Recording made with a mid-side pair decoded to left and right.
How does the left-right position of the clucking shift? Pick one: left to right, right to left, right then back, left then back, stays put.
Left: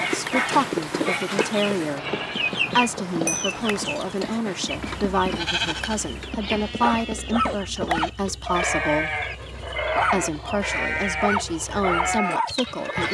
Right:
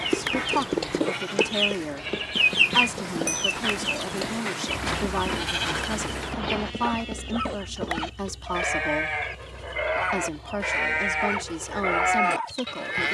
right to left.